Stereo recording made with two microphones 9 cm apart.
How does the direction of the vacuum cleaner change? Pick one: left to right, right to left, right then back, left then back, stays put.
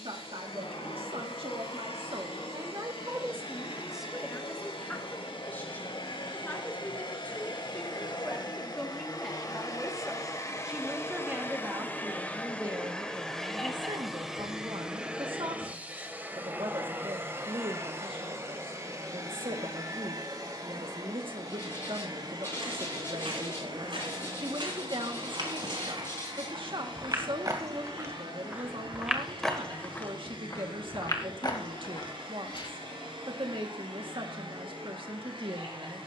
left to right.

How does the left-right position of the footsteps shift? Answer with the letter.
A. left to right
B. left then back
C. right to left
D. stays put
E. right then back
C.